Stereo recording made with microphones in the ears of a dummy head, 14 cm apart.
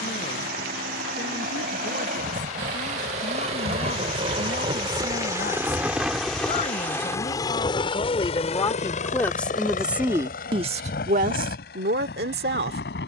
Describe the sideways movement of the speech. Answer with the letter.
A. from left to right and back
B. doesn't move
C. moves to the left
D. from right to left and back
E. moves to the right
E.